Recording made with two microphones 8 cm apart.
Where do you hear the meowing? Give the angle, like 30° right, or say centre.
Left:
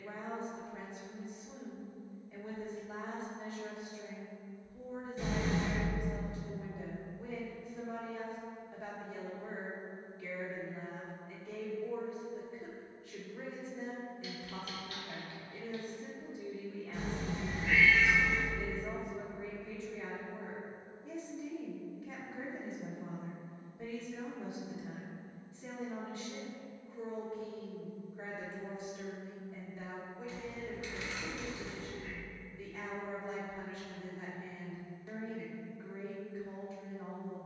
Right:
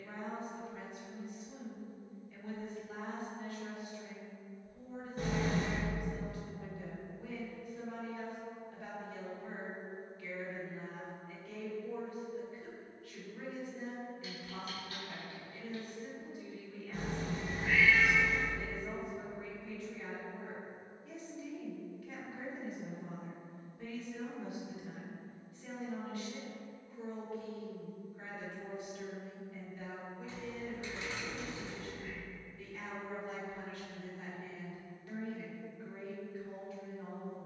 50° right.